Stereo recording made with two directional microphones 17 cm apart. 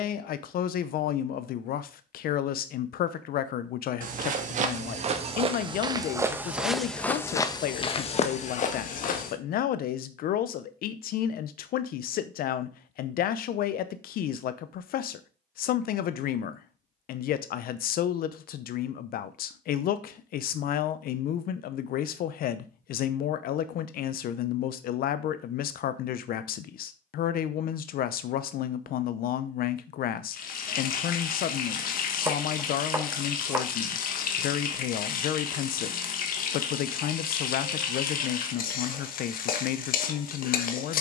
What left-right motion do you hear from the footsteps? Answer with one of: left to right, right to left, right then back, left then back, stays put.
right to left.